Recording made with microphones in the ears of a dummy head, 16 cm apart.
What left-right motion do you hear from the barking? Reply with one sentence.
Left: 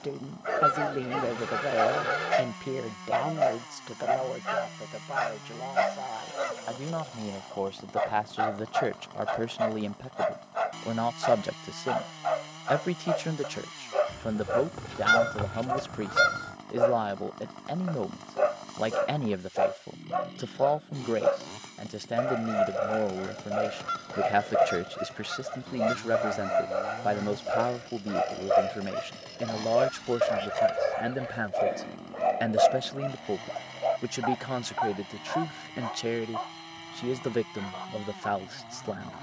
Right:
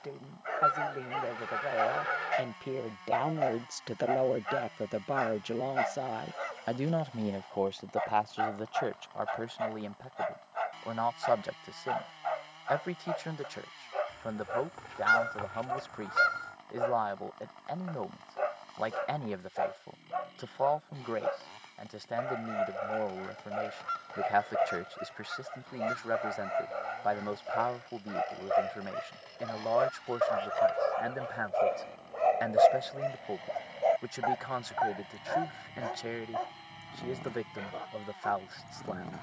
In this clip you hear the barking move from left to right.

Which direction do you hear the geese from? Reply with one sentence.
You can hear the geese on the left.